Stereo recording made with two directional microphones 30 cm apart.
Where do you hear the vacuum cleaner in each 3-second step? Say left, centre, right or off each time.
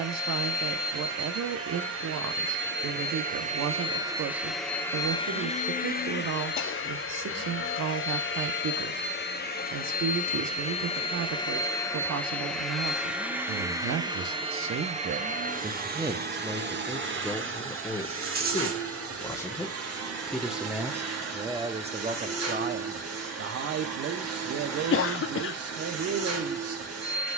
right, centre, left, left, centre, right, right, right, right.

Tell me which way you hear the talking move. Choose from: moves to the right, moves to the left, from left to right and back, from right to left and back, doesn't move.
from right to left and back.